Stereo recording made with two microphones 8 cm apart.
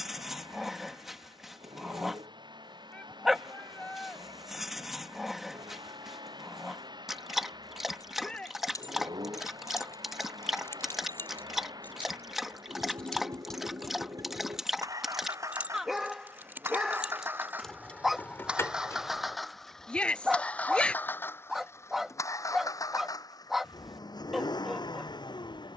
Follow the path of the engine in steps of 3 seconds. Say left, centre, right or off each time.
right, right, right, right, right, right, centre, left, left.